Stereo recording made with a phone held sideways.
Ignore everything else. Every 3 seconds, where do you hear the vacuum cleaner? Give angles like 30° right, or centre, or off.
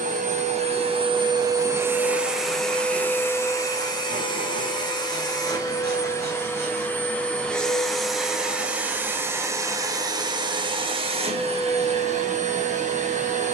20° right, 20° left, centre, 30° right, 50° right.